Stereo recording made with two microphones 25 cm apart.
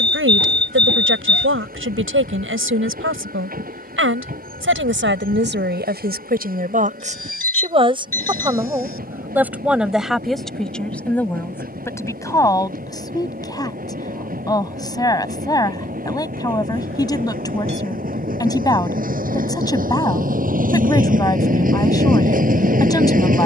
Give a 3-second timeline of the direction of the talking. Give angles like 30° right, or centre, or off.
50° right, 50° right, 30° right, centre, 10° left, 10° left, 10° left, 10° left.